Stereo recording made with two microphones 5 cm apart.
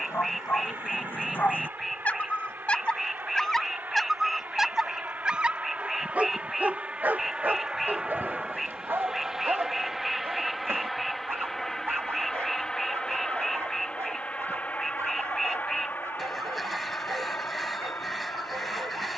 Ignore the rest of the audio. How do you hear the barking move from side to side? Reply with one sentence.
You can hear the barking travel towards the right.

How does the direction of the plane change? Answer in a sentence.
In this clip you hear the plane move from right to left.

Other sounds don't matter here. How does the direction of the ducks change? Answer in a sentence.
In this clip you hear the ducks stay in one place.